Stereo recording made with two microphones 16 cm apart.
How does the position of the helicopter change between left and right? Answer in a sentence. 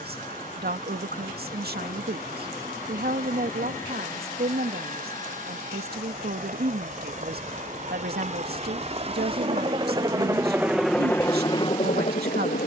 You can hear the helicopter move from right to left.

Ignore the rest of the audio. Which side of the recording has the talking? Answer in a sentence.
You can hear the talking on the right.